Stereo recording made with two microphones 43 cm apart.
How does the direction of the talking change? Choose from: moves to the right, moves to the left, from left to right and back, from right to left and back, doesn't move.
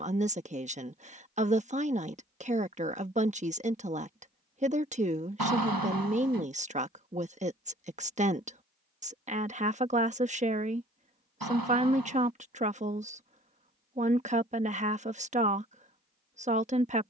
doesn't move.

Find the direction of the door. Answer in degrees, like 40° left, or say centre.
60° right.